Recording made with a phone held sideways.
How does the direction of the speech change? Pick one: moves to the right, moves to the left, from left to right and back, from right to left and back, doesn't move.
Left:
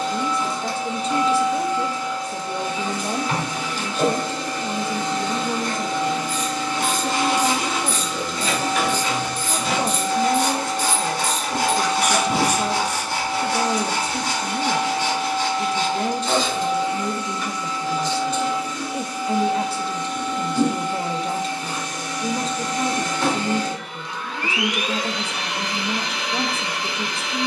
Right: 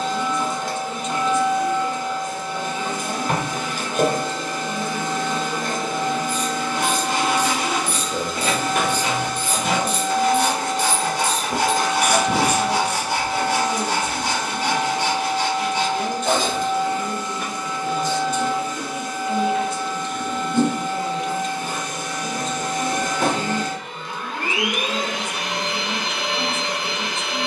doesn't move.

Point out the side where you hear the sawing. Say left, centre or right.
right.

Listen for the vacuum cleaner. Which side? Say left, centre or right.
right.